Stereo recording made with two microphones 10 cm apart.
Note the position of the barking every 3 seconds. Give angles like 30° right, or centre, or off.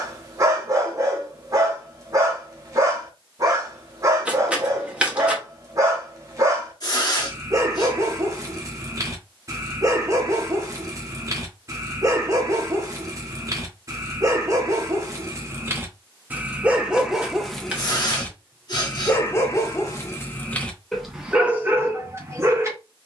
40° right, 40° right, 40° right, 40° right, 40° right, 10° right, 20° left, 20° right.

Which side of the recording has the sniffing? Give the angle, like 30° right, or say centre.
40° left.